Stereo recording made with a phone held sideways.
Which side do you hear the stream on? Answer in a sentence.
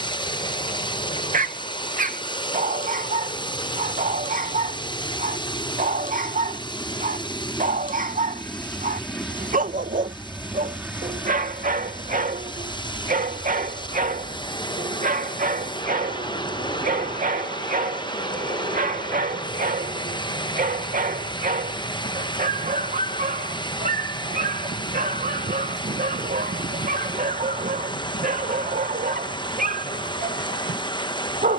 In this clip you hear the stream on the left.